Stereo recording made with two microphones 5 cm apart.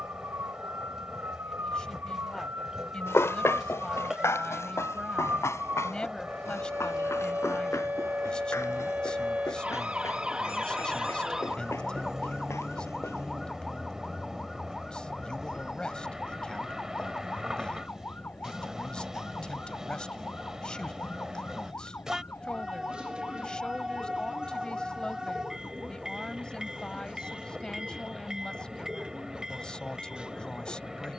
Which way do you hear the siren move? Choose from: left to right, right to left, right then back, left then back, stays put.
right to left.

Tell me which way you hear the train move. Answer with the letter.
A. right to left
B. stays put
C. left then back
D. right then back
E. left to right
B.